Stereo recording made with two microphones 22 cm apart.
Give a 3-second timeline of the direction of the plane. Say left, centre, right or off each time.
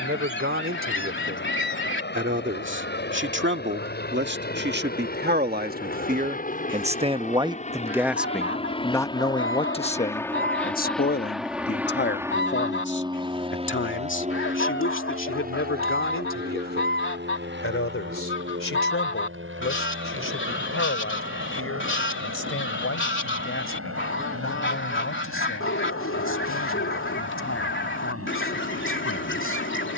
left, left, left, centre, right, right, right, right, right, right.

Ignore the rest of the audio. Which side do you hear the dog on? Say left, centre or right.
left.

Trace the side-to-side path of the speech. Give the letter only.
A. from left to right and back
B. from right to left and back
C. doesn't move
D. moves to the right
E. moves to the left
E.